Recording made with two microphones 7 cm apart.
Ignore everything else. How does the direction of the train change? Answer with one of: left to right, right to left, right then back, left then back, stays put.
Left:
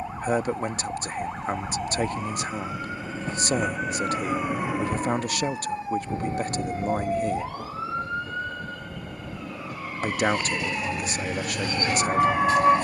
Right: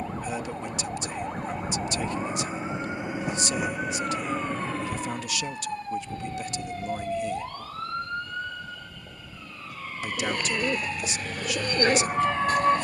right to left.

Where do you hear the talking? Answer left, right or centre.
left.